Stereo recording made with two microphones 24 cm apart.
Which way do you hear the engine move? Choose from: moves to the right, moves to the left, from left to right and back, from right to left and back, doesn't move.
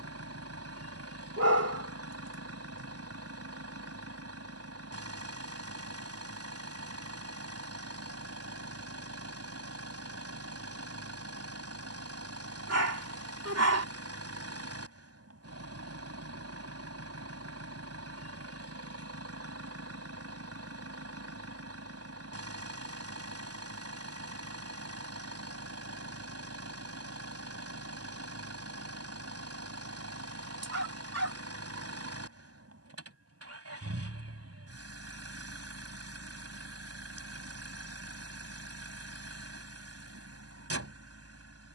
doesn't move.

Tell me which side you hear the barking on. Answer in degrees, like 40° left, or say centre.
80° right.